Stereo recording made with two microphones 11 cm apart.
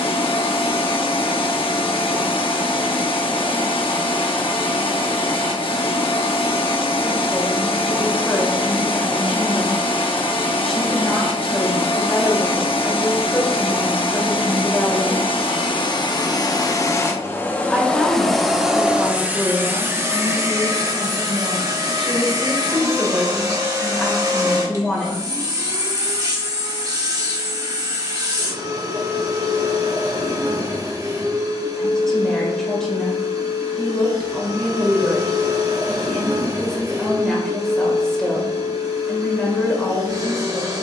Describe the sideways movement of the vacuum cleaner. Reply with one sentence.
You can hear the vacuum cleaner move to the right.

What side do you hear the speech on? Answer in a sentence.
You can hear the speech in the centre.